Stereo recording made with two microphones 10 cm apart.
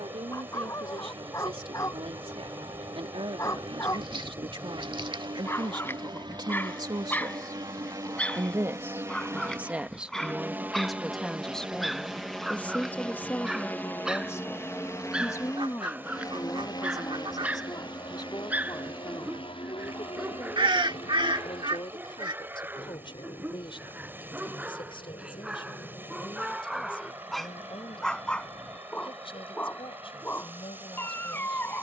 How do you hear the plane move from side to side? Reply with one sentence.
In this clip you hear the plane move from right to left.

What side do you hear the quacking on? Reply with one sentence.
In this clip you hear the quacking on the right.